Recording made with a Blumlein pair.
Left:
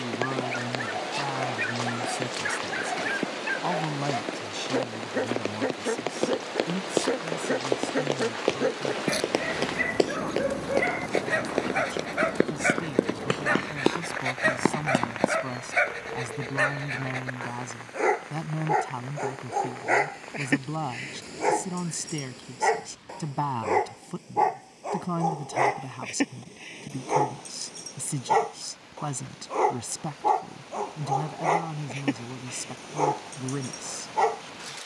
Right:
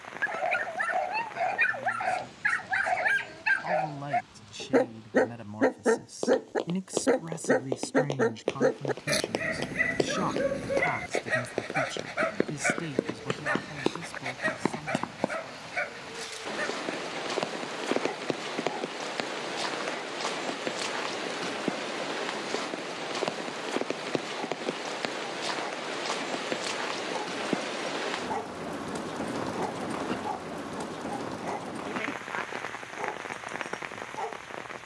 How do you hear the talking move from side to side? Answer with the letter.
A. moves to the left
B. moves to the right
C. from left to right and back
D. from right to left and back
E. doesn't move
C.